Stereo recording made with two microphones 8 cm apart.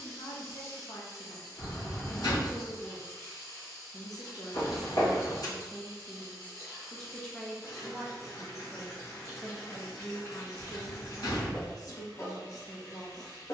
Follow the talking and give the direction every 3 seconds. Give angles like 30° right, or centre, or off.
50° left, 40° left, 10° left, 30° left, 50° left.